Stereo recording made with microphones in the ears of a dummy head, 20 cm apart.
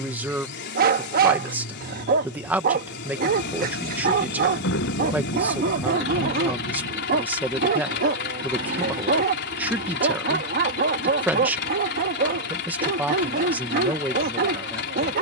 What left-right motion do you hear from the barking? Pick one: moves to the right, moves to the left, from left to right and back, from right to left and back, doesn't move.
doesn't move.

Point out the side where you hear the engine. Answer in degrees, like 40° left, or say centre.
50° left.